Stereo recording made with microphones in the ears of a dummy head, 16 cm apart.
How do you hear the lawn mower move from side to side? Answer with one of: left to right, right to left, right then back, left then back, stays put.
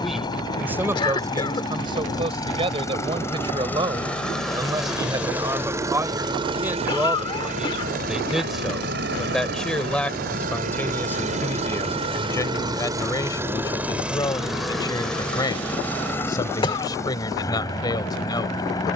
right then back.